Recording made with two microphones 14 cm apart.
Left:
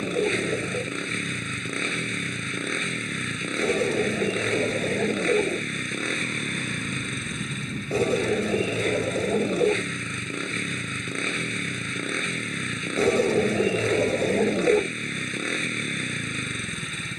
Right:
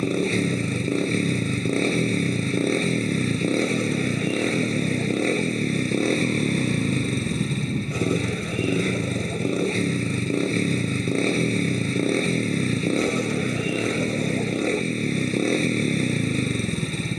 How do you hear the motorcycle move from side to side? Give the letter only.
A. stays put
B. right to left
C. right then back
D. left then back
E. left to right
A.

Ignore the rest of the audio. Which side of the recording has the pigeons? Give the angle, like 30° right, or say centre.
30° left.